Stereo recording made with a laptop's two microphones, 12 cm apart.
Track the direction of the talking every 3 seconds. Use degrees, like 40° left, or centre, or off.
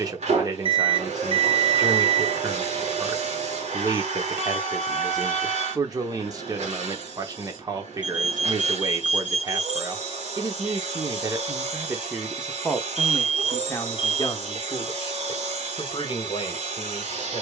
30° right, 30° right, 30° right, 30° right, 20° left, 50° left.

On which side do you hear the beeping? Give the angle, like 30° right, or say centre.
50° left.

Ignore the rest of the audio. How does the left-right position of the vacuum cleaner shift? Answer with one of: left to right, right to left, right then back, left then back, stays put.
stays put.